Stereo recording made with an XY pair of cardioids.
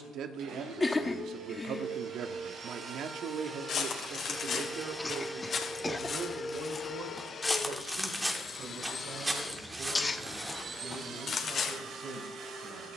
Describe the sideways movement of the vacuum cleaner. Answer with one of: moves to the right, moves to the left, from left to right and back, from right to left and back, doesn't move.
from right to left and back.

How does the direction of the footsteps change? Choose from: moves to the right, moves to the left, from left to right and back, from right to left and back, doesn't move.
from left to right and back.